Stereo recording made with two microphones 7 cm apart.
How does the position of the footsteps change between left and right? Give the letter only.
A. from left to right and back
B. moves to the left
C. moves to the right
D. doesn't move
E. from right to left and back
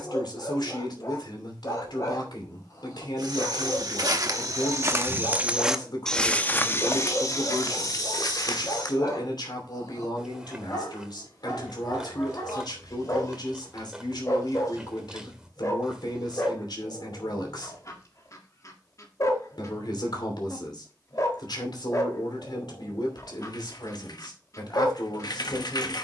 B.